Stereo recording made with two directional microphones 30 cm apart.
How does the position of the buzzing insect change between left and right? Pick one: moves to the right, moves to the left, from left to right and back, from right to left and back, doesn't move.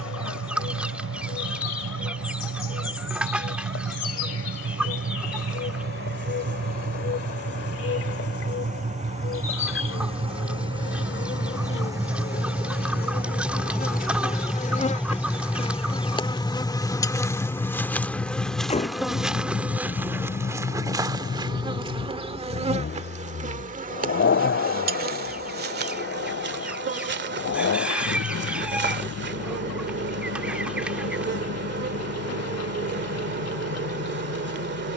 moves to the right.